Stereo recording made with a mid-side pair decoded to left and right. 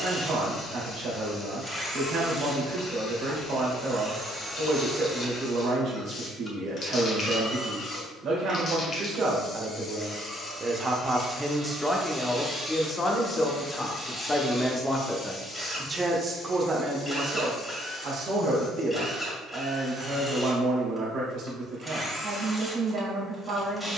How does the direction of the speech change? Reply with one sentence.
You can hear the speech move from right to left and back again.